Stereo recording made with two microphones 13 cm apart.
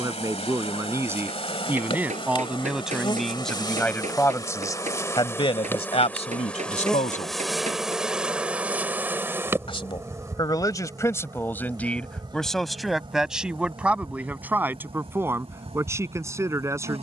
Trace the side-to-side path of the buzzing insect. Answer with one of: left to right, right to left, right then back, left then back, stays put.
left to right.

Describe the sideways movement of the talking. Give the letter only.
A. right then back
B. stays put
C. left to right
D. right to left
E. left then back
E.